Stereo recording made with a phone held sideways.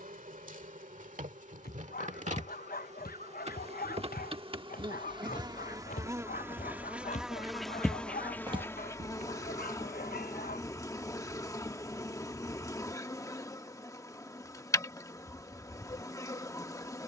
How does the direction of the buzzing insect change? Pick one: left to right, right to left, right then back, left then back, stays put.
right to left.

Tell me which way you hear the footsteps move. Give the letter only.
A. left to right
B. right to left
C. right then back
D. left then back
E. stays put
A.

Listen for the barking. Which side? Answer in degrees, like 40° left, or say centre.
60° left.